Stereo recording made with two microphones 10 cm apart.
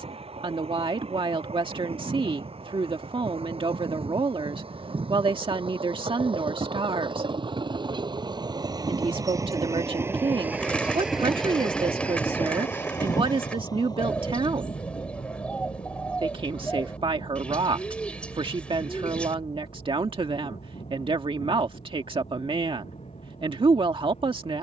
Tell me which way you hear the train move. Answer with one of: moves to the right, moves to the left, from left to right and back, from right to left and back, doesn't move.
moves to the left.